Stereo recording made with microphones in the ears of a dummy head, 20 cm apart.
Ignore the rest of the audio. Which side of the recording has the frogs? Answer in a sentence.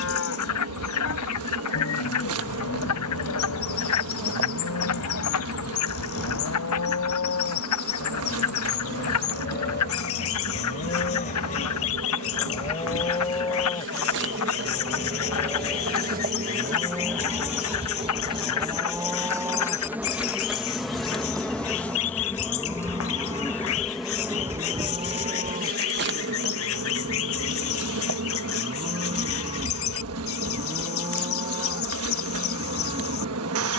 You can hear the frogs on the left.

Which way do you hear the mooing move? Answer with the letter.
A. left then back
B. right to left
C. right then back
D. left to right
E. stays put
D.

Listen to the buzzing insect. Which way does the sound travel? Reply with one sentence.
You can hear the buzzing insect go left and come back.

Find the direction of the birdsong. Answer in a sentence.
In this clip you hear the birdsong on the left.